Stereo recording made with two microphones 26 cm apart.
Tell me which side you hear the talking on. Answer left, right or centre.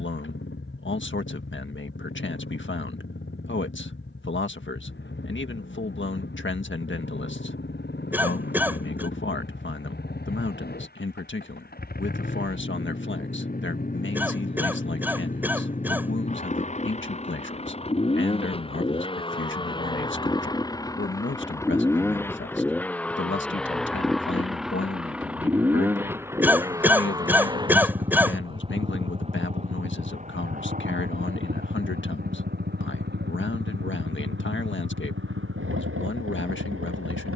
left.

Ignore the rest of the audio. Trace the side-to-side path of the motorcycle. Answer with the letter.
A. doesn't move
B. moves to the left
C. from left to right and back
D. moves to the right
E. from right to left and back
D.